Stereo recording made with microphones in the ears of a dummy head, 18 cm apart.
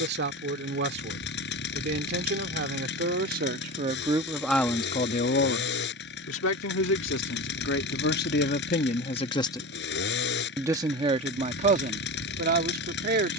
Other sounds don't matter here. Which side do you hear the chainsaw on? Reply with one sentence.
In this clip you hear the chainsaw on the left.